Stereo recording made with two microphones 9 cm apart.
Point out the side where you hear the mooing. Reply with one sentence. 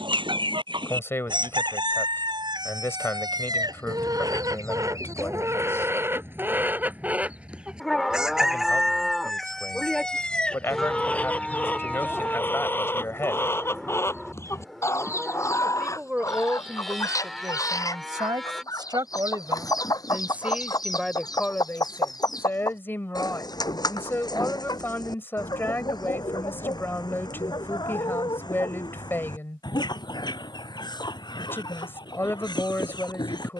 In this clip you hear the mooing in the centre.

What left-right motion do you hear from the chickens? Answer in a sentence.
You can hear the chickens move to the left.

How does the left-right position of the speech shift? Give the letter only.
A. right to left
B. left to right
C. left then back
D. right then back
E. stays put
D.